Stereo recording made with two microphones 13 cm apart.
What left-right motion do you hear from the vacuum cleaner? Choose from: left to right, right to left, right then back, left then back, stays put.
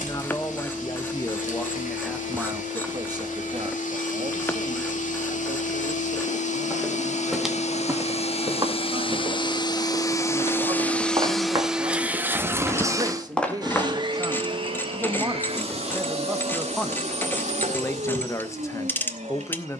left to right.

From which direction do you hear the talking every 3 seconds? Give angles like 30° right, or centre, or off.
10° left, 40° right, 50° right, 40° right, 30° right, centre, 20° left.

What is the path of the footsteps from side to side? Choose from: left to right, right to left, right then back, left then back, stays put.
right then back.